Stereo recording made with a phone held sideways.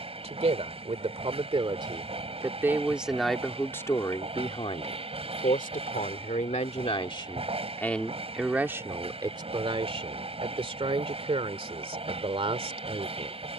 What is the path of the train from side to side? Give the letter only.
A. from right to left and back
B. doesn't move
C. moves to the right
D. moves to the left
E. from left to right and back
B.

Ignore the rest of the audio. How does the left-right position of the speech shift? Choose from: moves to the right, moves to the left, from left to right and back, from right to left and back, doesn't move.
from right to left and back.